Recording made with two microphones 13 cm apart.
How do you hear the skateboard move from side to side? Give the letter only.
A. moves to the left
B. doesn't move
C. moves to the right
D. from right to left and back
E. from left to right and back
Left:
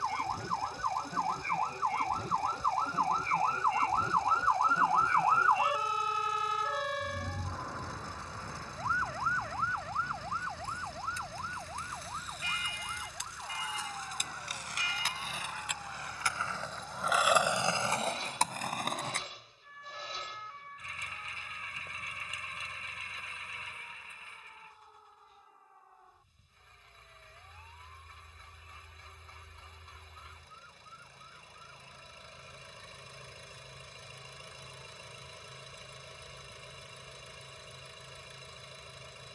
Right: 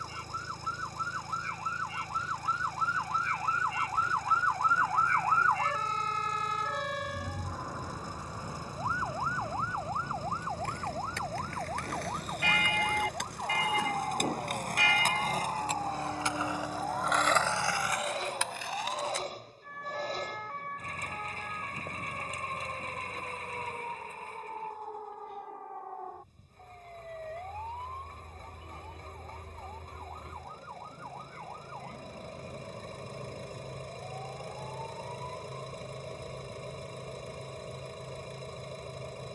A.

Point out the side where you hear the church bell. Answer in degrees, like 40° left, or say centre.
70° right.